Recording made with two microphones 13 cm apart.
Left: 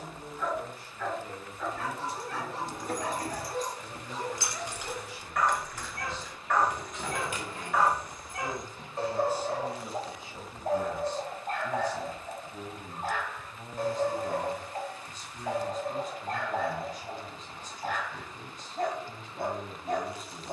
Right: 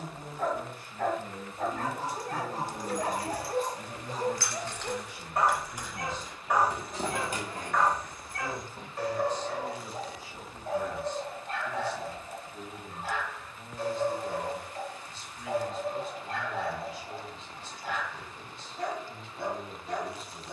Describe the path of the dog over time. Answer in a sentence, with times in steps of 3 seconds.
In this clip you hear the dog on the right from 0 s, in the centre from 6 s and on the left from 9 s.